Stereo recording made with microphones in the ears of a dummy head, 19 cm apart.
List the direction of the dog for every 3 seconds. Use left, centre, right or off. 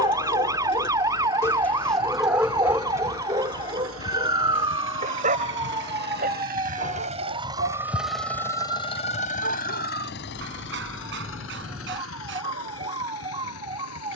centre, right, right, right, right.